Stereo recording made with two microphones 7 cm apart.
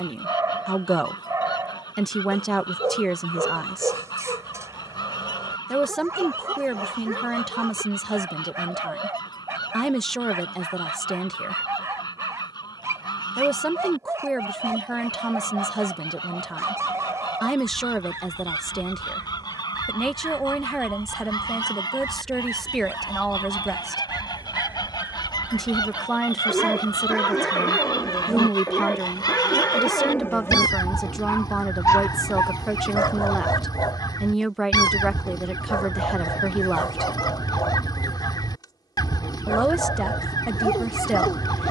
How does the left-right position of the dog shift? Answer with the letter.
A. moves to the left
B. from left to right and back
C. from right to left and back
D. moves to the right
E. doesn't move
A.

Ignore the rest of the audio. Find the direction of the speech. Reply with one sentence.
In this clip you hear the speech in the centre.